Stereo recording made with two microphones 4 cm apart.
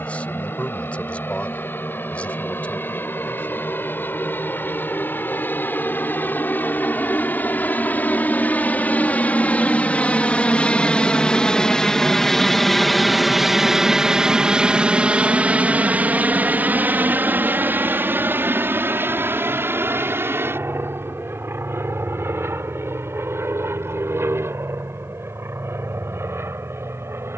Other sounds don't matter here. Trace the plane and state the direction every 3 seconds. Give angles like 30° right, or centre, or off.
70° left, 60° left, 50° left, 30° left, 10° right, 40° right, 60° right, 70° right, 70° right.